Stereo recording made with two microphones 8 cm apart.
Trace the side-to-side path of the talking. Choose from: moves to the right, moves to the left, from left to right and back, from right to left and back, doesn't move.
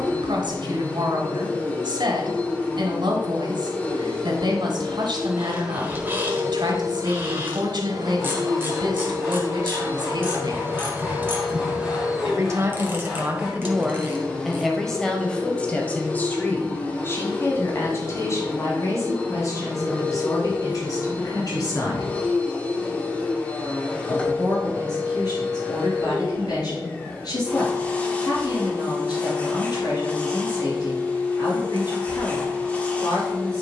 moves to the left.